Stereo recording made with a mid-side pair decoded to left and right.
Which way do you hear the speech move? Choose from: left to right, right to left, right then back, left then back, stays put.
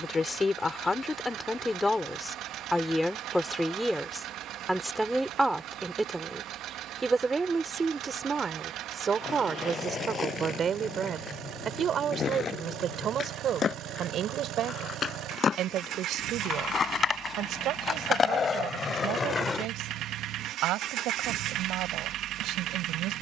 left to right.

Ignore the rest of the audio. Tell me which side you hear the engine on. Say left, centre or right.
right.